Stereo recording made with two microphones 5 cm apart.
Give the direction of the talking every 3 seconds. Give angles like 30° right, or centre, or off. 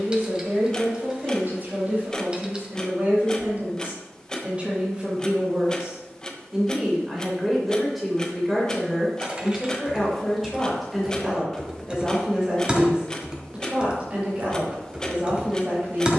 40° right, 30° right, centre, centre, 30° right, 40° right.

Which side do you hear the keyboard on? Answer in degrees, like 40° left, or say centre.
20° right.